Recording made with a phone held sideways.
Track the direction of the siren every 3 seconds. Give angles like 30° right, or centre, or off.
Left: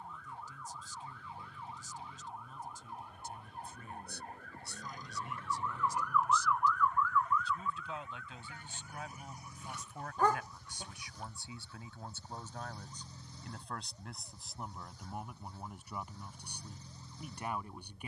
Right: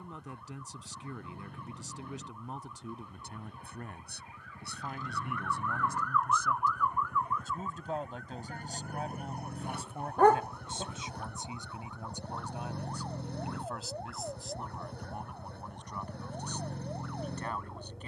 70° left, 40° left, 20° right, 60° right, 70° right, 80° right.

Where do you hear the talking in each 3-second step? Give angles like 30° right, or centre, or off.
70° right, 60° right, 50° right, 30° right, 10° right, 10° left.